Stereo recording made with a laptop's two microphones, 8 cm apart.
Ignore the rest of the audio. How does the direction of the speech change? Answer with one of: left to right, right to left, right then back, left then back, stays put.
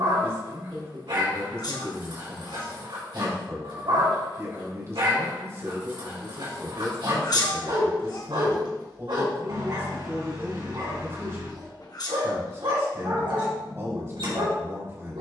stays put.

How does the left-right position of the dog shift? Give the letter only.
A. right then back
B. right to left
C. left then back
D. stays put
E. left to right
D.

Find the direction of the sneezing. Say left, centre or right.
left.